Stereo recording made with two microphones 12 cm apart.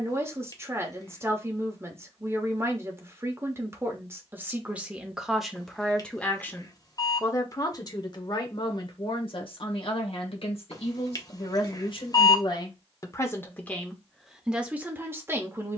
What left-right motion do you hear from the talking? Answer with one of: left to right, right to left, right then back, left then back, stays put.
left then back.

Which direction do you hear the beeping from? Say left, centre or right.
left.